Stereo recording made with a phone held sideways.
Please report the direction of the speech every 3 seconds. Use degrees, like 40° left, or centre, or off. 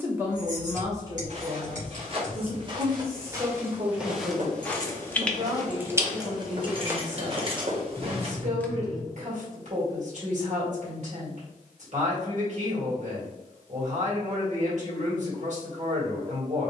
30° right, 50° right, 60° right, 60° right, 60° right, 60° right.